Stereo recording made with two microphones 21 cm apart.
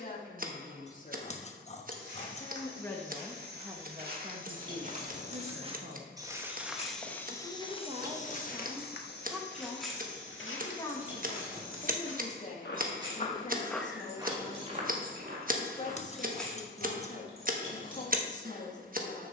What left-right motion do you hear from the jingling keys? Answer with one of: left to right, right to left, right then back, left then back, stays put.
right then back.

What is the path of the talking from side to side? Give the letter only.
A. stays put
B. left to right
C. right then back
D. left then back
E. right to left
C.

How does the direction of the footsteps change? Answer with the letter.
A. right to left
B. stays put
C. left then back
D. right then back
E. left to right
C.